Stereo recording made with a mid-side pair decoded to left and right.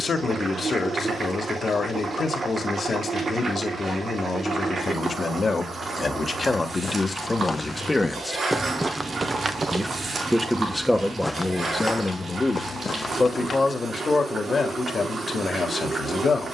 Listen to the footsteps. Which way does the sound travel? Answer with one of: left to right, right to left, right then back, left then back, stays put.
right then back.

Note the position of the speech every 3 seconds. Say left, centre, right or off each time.
left, left, left, centre, left, left.